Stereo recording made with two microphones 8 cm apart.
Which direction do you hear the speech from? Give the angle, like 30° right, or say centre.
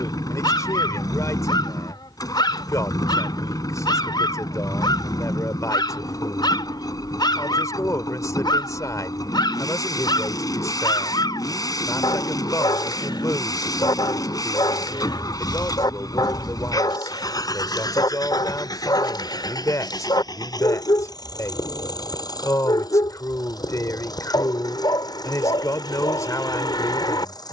40° left.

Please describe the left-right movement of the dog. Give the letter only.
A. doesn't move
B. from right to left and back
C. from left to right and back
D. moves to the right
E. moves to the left
A.